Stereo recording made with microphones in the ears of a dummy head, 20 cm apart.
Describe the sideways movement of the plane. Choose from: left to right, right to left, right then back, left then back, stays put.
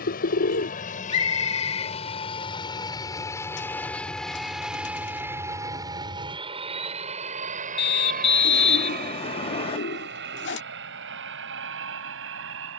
left to right.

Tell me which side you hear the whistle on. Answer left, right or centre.
left.